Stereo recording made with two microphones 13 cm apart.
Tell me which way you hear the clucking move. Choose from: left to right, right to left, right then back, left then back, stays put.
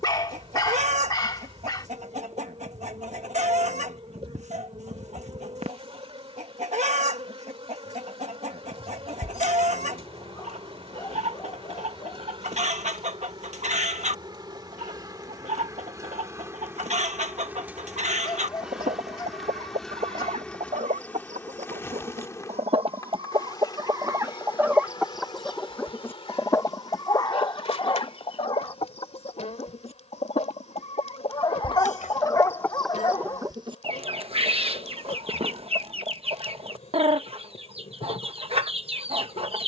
left then back.